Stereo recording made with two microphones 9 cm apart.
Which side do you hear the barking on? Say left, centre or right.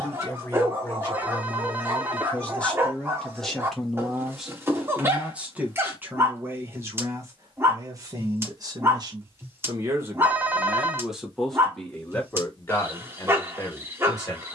right.